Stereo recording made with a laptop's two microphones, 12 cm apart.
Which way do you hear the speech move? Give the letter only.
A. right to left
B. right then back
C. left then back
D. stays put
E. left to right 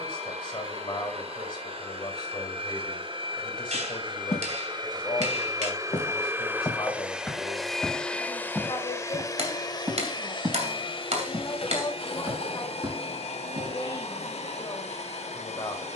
D.